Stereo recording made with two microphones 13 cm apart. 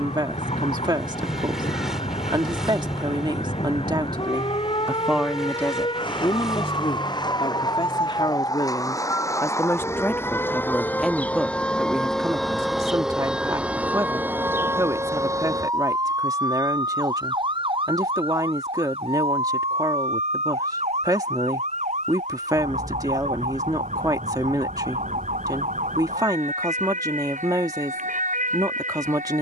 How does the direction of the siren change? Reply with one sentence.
In this clip you hear the siren move to the right.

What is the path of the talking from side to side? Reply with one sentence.
In this clip you hear the talking go left and come back.